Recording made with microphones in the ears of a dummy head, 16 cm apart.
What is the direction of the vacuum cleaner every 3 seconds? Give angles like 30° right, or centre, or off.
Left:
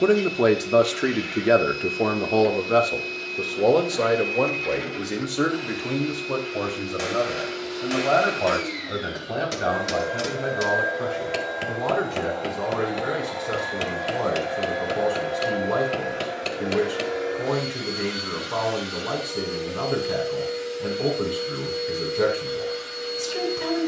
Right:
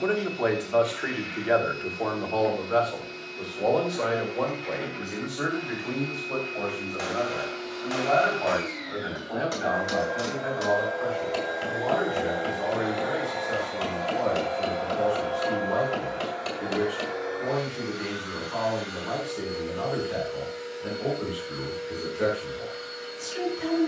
70° left, 70° left, 60° left, 30° left, centre, 30° left, 60° left, 60° left.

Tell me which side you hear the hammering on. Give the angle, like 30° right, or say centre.
30° left.